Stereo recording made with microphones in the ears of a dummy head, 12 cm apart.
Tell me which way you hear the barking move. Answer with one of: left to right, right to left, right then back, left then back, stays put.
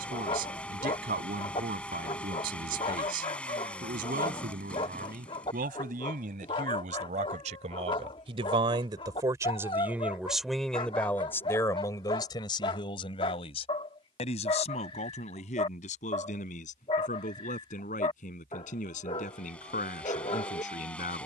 stays put.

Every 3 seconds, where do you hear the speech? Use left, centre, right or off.
right, right, right, centre, left, left, left.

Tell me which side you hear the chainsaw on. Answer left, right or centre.
centre.